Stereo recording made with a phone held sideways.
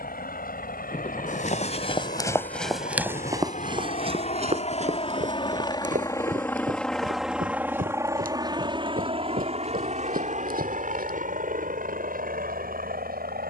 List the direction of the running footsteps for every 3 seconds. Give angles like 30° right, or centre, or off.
30° left, 40° right, 60° right, 60° right, off.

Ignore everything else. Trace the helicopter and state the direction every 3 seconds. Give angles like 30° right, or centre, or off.
70° left, 40° left, 10° right, 50° right, 60° right.